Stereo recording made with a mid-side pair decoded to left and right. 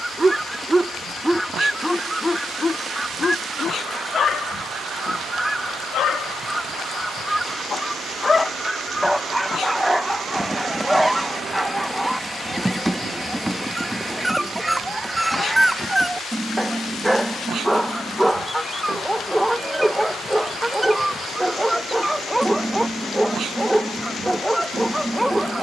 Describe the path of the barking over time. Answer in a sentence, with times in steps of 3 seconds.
In this clip you hear the barking in the centre from 0 s, on the left from 3 s and in the centre from 9 s.